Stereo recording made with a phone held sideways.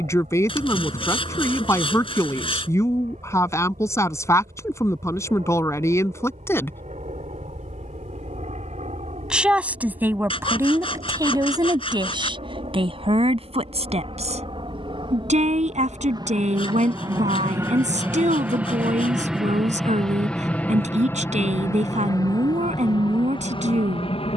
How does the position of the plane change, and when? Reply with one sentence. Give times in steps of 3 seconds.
In this clip you hear the plane on the right from 0 s, in the centre from 18 s and on the left from 21 s.